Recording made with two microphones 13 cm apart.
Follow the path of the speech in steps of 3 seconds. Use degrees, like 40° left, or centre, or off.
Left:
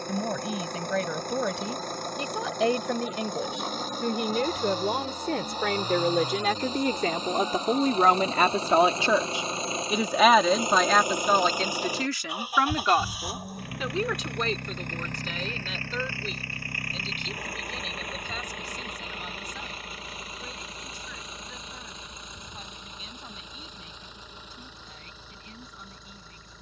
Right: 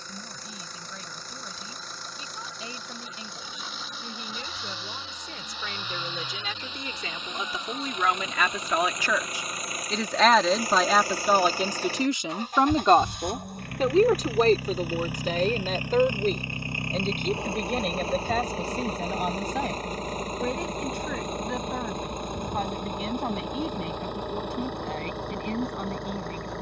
80° left, 70° left, 50° left, centre, 40° right, 50° right, 60° right, 70° right, 70° right.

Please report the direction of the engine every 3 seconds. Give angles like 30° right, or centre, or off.
50° left, 40° left, 40° left, 20° left, centre, 20° right, 40° right, 50° right, 60° right.